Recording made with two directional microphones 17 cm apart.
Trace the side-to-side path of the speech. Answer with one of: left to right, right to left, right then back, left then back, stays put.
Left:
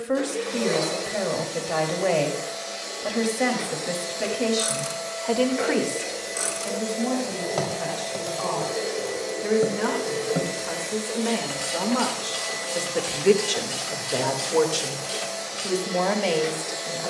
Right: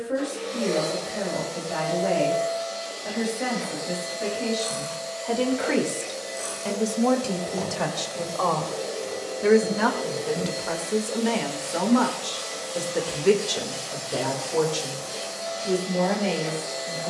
right then back.